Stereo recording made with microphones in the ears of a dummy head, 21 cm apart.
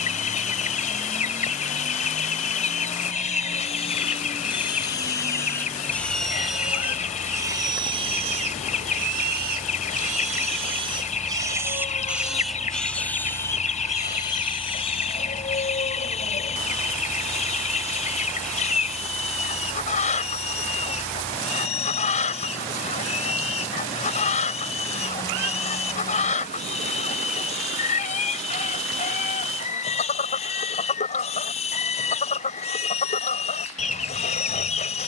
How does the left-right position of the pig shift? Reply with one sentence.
In this clip you hear the pig move from left to right and back again.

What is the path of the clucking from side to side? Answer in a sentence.
In this clip you hear the clucking stay in one place.